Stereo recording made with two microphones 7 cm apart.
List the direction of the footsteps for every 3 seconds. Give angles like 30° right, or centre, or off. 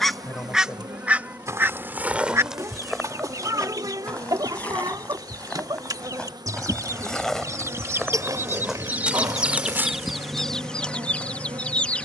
20° right, 10° left, 10° left, 20° right.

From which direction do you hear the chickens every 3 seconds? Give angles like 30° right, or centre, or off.
20° right, 60° right, 40° right, centre.